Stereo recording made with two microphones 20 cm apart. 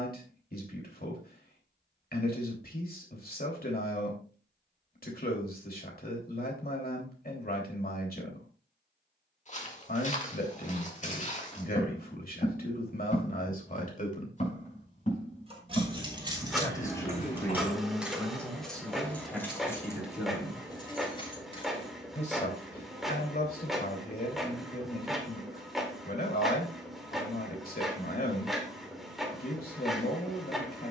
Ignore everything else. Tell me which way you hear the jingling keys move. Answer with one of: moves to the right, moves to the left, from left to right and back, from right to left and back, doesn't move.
moves to the left.